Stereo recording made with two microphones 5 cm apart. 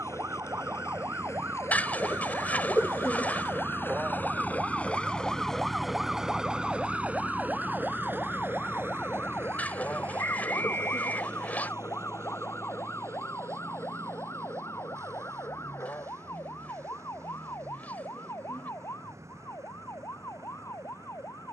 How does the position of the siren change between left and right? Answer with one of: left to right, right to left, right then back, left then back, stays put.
right to left.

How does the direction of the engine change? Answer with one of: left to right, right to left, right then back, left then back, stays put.
left to right.